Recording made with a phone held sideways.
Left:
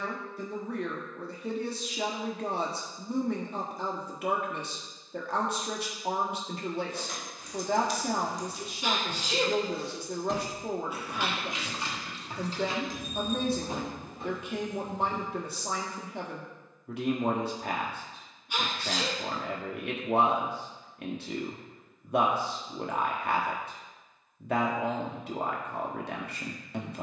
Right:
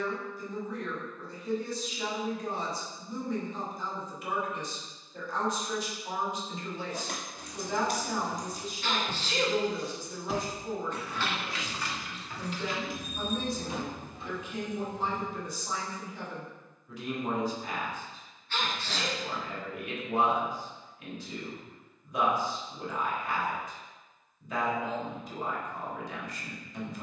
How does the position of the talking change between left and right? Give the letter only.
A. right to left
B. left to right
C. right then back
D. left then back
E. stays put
E.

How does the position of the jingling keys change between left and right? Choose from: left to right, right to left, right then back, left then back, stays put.
right to left.